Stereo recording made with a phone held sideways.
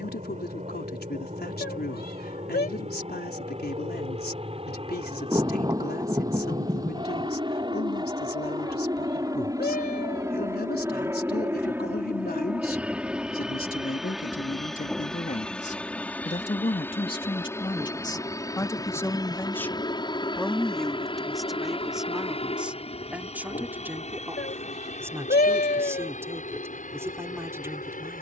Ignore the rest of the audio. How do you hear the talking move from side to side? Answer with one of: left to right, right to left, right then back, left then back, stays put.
left to right.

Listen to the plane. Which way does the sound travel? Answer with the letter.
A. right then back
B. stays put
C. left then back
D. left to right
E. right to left
E.